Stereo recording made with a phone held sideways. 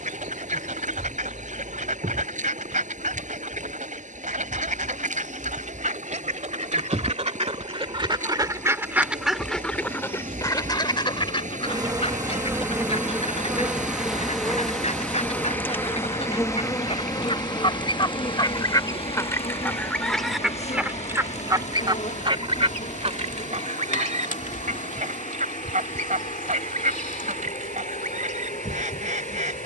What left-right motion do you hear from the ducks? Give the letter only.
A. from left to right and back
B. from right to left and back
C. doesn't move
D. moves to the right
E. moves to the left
B.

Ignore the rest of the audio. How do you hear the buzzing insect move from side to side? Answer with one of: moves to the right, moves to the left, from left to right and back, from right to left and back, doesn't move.
moves to the left.